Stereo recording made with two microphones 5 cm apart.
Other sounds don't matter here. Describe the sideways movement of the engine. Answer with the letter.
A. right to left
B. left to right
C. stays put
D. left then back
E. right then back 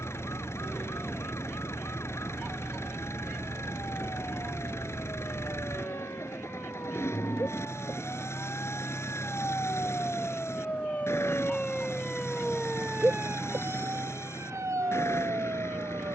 C.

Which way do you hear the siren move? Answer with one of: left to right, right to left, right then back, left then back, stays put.
left to right.